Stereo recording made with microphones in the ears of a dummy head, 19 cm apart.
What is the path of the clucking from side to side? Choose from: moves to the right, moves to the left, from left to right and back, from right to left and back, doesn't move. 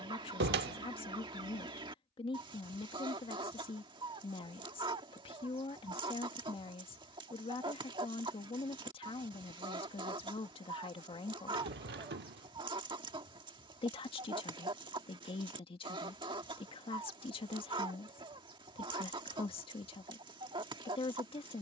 doesn't move.